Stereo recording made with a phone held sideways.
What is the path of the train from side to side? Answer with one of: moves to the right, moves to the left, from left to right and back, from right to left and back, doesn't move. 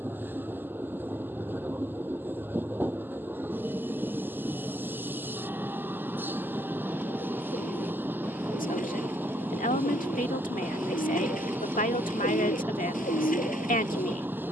doesn't move.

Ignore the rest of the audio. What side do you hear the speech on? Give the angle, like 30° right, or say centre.
70° left.